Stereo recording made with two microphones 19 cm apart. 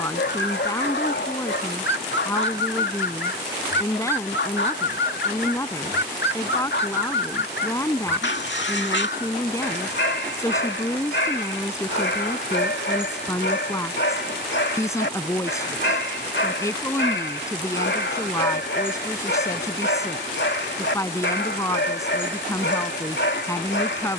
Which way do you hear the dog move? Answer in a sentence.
You can hear the dog stay in one place.